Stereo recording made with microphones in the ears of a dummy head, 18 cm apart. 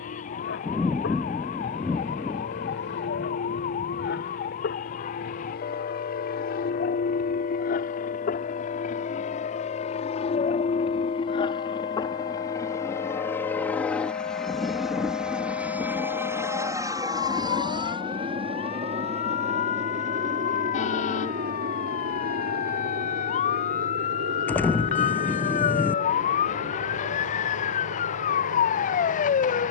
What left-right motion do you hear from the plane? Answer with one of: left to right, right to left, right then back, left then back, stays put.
left to right.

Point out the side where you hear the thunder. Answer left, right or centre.
centre.